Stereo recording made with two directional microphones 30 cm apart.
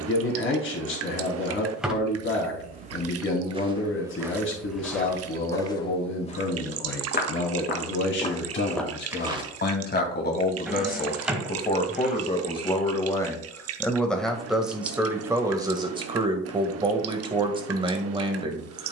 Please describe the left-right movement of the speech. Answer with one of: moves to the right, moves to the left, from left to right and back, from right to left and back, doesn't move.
moves to the right.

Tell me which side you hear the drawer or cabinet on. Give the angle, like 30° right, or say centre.
centre.